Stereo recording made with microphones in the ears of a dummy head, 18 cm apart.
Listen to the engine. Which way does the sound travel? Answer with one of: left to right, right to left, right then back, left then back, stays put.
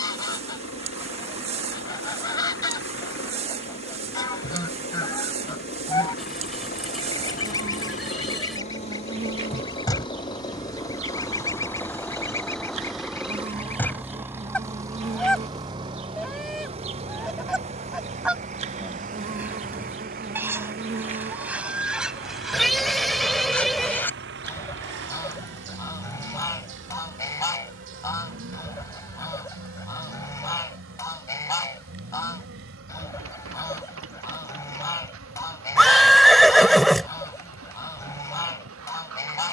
left to right.